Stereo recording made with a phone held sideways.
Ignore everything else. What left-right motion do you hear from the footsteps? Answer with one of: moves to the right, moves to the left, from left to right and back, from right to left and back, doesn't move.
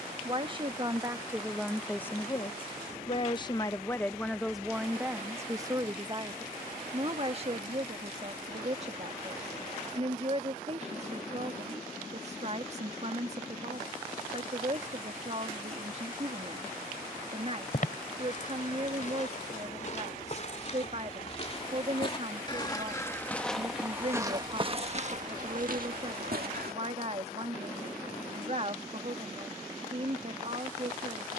moves to the right.